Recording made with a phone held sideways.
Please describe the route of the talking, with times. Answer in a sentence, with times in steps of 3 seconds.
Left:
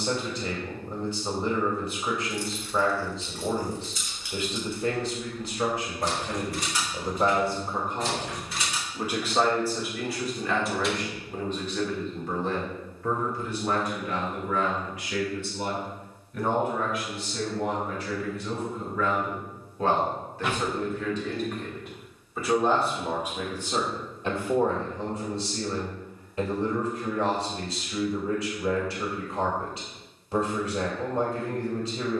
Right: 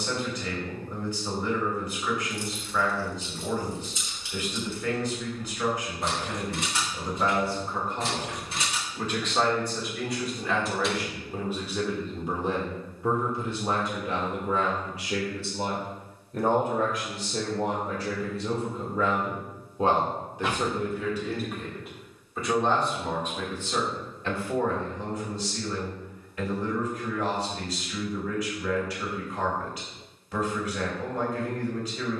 You can hear the talking on the left from 0 s, in the centre from 9 s, on the right from 12 s, in the centre from 21 s and on the left from 24 s.